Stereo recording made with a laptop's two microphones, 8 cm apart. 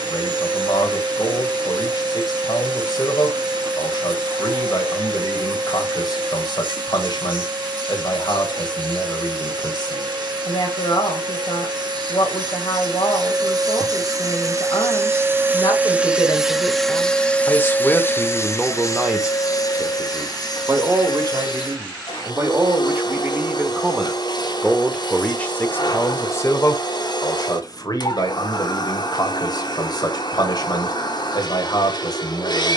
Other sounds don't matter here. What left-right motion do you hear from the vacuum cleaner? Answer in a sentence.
You can hear the vacuum cleaner travel towards the left.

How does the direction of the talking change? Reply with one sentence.
You can hear the talking move from left to right and back again.